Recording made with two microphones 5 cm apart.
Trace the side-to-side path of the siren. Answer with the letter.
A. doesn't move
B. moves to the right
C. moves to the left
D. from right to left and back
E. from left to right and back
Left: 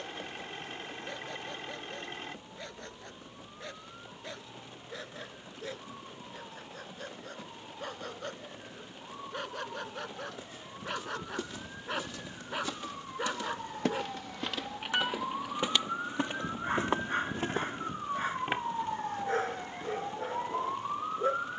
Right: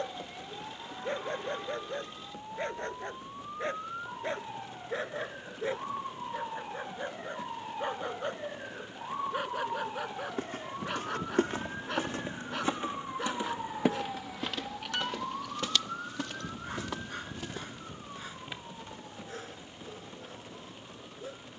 C.